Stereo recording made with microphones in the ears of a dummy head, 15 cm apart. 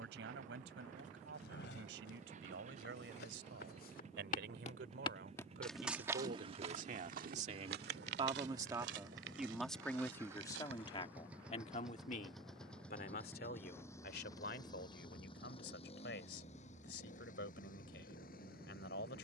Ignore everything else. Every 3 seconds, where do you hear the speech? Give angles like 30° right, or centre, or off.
70° right, 60° right, 40° right, 20° left, 60° left, 70° left, 70° left.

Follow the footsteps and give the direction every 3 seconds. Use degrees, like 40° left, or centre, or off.
70° left, 40° left, 50° right, 80° right, off, off, off.